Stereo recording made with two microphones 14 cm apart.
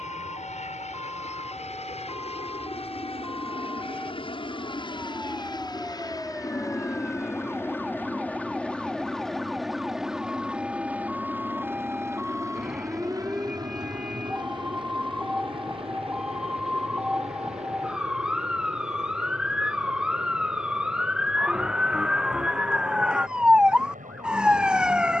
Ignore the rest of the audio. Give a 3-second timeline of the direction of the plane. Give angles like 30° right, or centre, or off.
50° left, 40° left, 20° left, 10° right, 30° right, 40° right, 50° right, 60° right, 60° right.